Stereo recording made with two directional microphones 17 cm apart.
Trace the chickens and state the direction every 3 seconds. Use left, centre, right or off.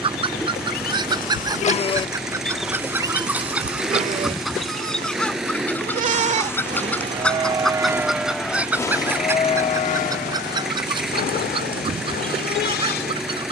right, centre, centre, right, right.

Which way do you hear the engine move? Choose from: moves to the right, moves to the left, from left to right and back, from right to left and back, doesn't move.
doesn't move.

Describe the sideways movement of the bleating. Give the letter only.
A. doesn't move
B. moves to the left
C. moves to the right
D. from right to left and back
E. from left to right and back
E.